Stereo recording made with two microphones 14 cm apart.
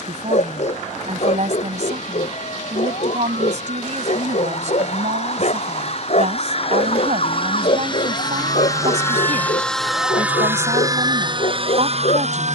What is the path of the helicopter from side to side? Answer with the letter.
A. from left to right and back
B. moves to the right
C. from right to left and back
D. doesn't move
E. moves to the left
B.